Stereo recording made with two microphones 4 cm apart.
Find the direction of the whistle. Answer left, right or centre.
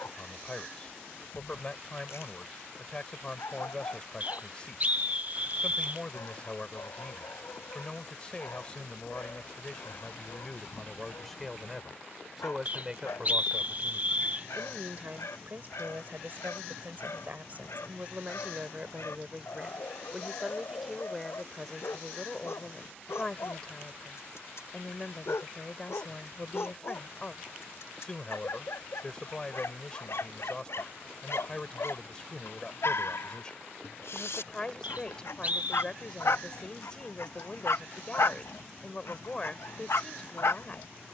right.